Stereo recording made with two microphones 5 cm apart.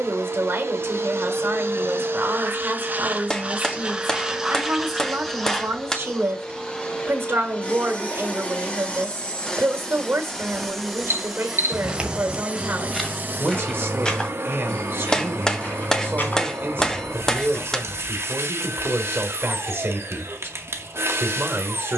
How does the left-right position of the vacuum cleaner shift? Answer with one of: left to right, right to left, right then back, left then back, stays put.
left then back.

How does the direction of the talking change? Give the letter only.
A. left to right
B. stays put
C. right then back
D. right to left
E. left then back
B.